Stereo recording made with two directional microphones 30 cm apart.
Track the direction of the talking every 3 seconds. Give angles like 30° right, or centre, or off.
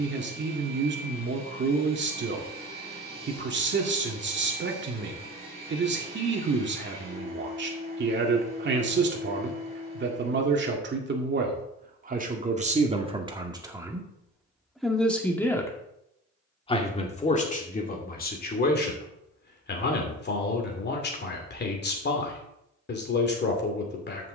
40° right, 40° right, 40° right, 40° right, 20° right, 20° left, 30° left, 40° left.